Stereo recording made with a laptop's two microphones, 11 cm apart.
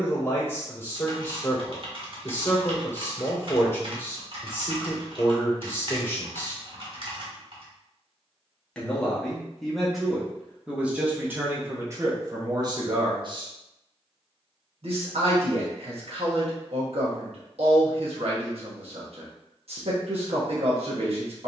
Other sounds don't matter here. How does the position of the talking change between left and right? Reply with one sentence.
In this clip you hear the talking go from the left side to the right.